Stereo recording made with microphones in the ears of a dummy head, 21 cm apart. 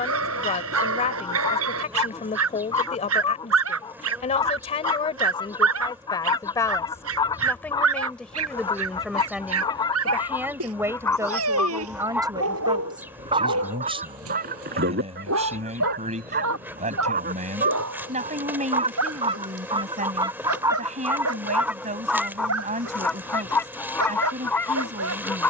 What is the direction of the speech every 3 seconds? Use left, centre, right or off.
left, left, centre, centre, right, right, right, right, right.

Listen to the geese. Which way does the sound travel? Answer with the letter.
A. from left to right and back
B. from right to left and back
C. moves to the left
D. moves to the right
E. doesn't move
A.